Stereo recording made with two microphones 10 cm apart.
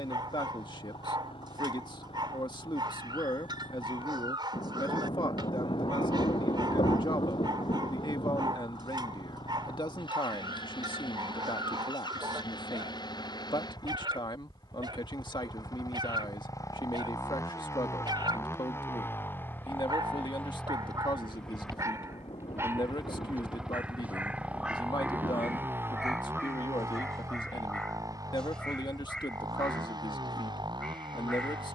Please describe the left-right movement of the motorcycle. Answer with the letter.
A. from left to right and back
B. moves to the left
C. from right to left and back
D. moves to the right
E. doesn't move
D.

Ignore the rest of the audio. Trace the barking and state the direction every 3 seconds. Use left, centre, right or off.
right, right, right, right, right, right, right, right, centre, centre, centre.